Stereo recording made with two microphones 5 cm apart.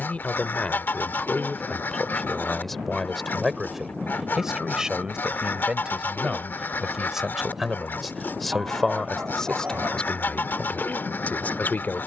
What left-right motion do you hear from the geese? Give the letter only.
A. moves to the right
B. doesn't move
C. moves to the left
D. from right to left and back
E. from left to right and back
B.